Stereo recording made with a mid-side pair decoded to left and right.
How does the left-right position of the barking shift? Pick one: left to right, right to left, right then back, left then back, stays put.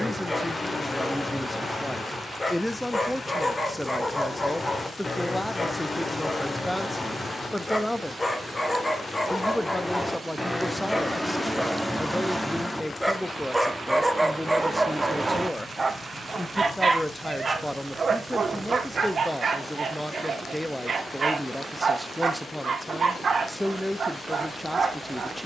left to right.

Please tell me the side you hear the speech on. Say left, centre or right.
centre.